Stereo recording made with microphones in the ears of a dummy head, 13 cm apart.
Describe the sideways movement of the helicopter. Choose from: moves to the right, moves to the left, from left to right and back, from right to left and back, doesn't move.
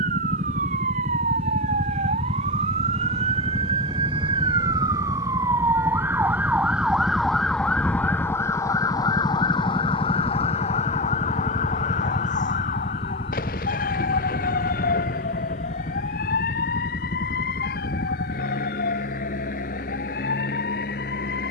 moves to the left.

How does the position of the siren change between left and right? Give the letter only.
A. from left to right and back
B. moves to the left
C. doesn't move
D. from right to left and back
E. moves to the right
B.